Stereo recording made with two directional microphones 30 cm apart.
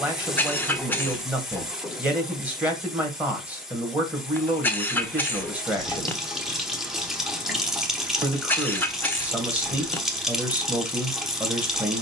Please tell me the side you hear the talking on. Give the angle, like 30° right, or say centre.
10° right.